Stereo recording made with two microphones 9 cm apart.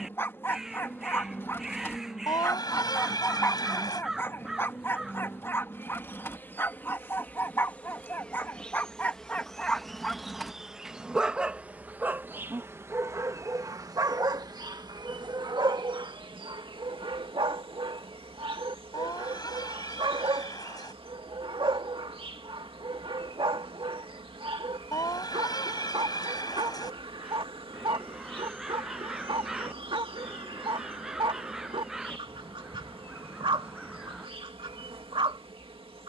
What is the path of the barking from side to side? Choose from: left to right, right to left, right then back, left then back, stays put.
left to right.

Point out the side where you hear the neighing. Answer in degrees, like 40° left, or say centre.
40° left.